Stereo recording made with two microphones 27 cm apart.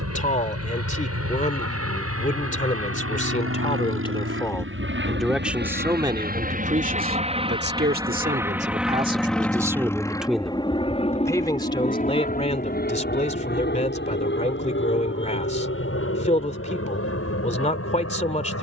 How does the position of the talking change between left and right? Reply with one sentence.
In this clip you hear the talking go right and come back.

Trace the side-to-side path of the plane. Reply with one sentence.
In this clip you hear the plane move to the left.